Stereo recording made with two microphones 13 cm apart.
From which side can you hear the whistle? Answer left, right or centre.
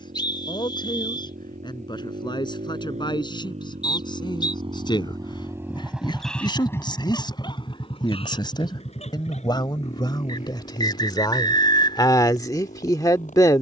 left.